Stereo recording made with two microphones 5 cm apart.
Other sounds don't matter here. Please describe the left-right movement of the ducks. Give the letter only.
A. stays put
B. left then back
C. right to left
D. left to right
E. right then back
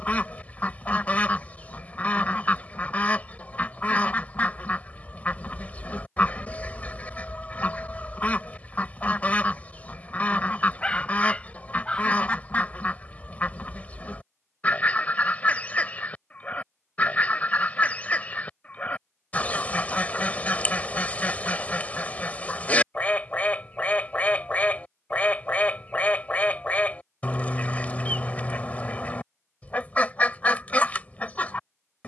A.